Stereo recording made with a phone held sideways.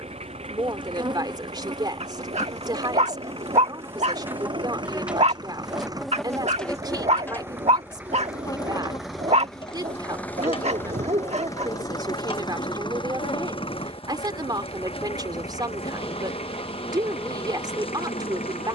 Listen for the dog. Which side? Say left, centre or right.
right.